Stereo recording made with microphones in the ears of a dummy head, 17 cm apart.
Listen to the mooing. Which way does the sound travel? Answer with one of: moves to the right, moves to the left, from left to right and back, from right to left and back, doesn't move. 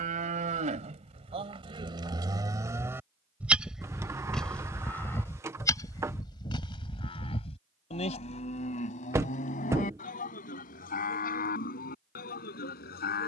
moves to the left.